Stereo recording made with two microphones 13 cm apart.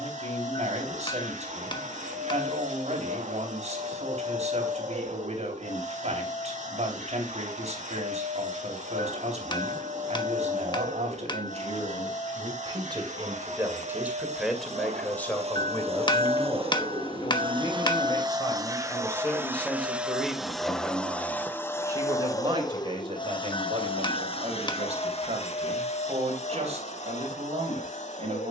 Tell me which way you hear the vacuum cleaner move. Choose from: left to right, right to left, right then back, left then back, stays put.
right to left.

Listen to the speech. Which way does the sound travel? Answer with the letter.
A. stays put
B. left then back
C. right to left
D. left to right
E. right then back
B.